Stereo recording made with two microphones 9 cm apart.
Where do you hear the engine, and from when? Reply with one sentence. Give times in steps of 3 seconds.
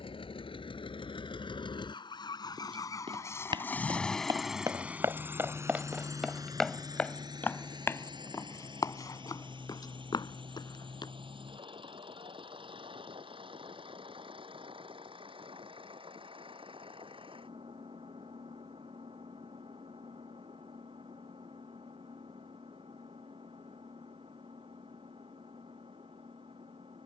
In this clip you hear the engine on the left from 0 s, in the centre from 3 s and on the right from 6 s.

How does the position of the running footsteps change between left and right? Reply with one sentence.
You can hear the running footsteps go from the right side to the left.